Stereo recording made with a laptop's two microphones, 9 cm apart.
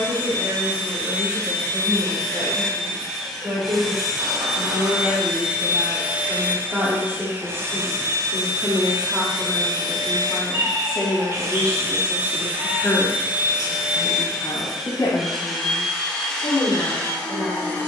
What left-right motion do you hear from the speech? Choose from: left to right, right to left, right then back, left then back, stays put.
right to left.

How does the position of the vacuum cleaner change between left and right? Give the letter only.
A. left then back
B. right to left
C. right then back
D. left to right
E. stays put
C.